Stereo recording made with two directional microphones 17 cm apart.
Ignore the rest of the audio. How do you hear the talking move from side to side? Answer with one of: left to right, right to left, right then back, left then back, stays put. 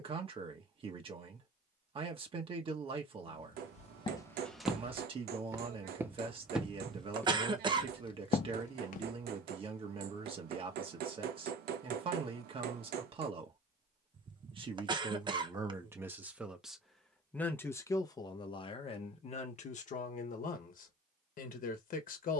right to left.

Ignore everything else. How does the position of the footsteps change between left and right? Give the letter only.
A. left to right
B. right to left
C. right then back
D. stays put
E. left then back
C.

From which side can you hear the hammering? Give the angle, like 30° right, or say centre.
70° right.